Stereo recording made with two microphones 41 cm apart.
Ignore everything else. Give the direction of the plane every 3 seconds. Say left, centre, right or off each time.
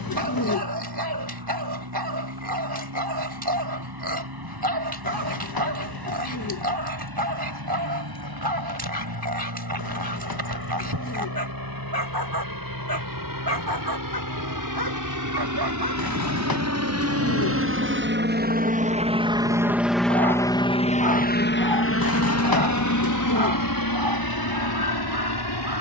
right, right, right, right, right, right, centre, left, left.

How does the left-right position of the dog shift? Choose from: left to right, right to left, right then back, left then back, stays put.
stays put.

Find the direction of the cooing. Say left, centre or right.
left.